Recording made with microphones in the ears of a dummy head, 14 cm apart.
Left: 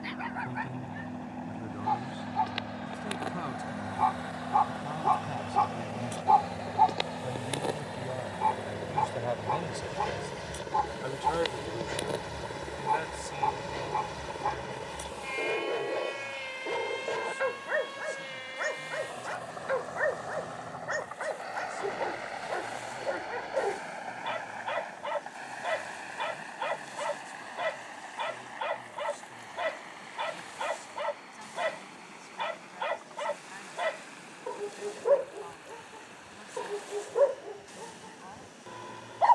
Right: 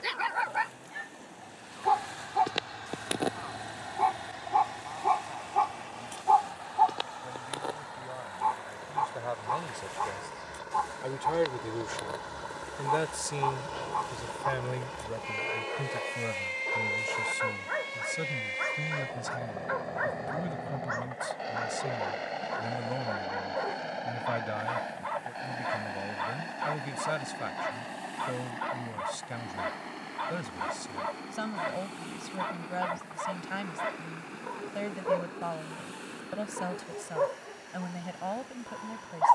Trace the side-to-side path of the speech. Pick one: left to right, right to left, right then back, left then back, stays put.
left to right.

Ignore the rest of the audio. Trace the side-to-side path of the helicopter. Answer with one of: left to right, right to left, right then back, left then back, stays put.
left to right.